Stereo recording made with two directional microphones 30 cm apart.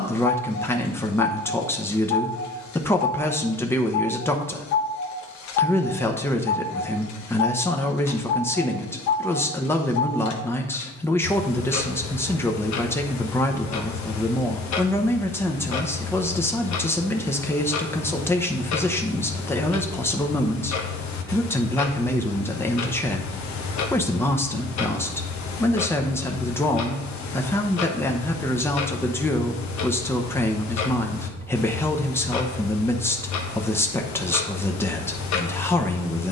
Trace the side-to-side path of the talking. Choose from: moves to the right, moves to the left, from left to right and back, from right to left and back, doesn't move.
doesn't move.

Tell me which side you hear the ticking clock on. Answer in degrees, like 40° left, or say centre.
70° left.